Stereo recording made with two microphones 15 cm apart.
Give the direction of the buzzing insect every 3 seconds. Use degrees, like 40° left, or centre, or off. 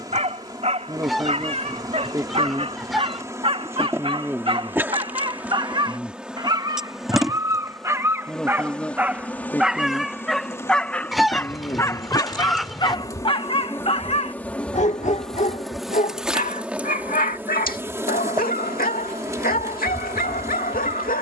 20° right, 10° right, centre, 20° left, 20° left, 10° right, 20° right.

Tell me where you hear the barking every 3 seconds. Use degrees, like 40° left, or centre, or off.
40° right, 40° right, 20° right, centre, 30° left, 60° left, 70° left.